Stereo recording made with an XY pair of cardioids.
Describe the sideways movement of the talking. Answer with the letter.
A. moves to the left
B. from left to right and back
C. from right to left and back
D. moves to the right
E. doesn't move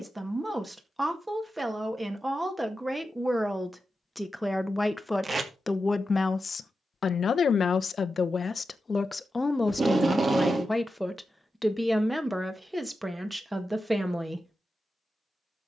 C.